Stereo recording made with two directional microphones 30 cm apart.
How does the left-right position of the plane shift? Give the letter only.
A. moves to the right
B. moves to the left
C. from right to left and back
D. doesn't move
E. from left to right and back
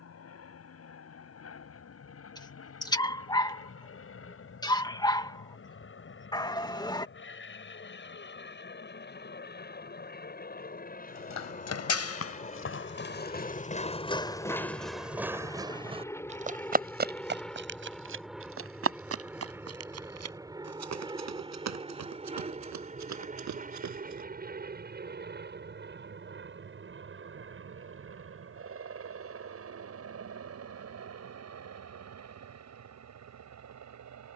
A.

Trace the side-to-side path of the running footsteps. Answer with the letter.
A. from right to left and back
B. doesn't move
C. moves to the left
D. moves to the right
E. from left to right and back
D.